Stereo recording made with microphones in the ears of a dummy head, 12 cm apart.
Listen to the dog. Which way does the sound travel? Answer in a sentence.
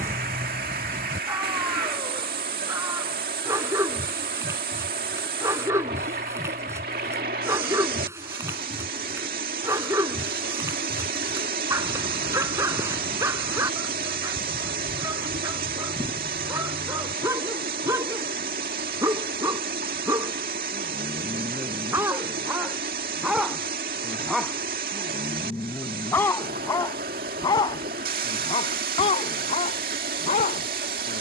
In this clip you hear the dog move to the left.